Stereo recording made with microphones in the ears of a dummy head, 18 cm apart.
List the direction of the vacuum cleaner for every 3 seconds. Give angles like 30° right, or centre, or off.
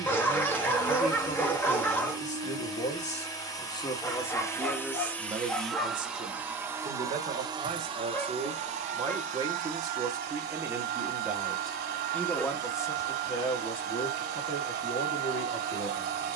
20° left, 10° left, 20° right, 50° right, 50° right, 50° right.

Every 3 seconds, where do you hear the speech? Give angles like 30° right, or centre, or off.
40° left, centre, 30° right, 10° right, 20° left, 30° left.